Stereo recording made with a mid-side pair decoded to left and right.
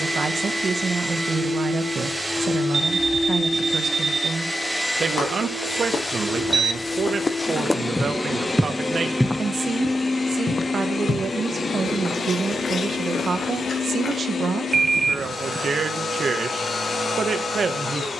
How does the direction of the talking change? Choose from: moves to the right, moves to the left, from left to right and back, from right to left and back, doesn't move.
doesn't move.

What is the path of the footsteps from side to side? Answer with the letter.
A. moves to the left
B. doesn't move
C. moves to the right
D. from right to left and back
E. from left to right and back
E.